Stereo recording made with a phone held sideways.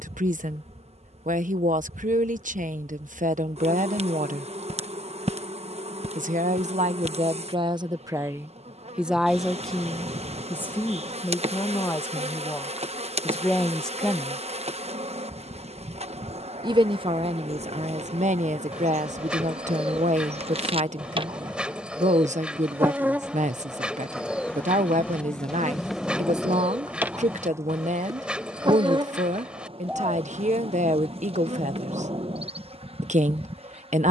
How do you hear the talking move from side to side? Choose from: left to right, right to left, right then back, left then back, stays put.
left then back.